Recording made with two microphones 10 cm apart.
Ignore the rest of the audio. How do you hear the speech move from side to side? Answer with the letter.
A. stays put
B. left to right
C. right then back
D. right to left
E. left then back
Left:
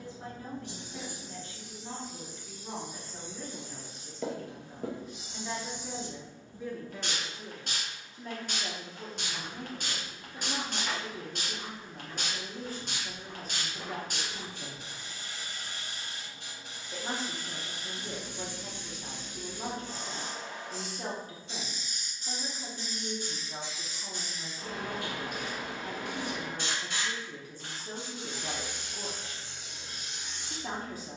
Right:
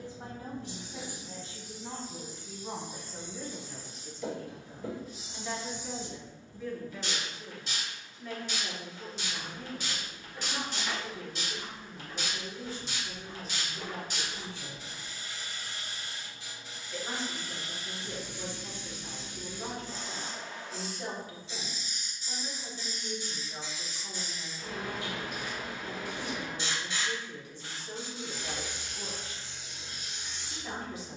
D.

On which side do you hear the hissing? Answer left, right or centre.
left.